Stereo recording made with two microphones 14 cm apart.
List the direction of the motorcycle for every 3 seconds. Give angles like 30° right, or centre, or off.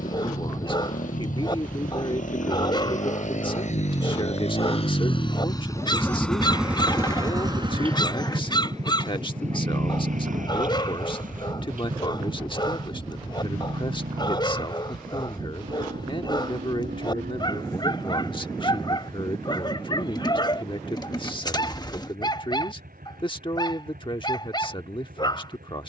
70° left, 50° left, 30° right, 60° right, 70° right, 80° right, 80° right, 80° right, 80° right.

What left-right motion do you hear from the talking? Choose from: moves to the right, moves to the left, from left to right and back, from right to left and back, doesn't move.
doesn't move.